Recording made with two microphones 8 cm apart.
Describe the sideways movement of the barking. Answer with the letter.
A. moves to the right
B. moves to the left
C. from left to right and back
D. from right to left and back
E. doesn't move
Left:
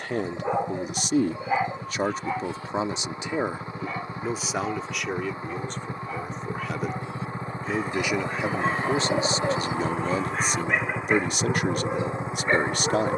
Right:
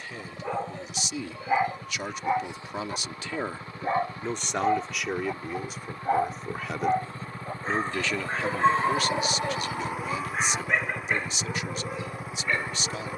C.